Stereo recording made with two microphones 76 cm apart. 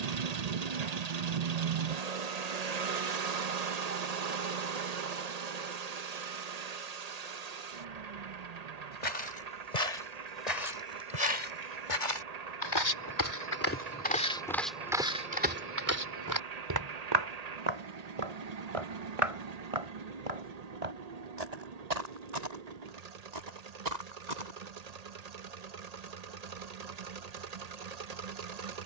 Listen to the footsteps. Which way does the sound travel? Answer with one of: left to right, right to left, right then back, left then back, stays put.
left to right.